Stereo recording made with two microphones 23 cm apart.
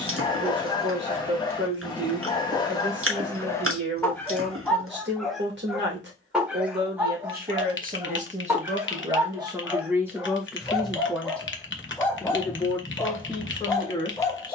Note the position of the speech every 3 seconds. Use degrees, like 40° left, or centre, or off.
50° right, 50° right, 40° right, 10° right, 20° left.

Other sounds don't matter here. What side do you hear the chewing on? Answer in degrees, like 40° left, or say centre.
70° right.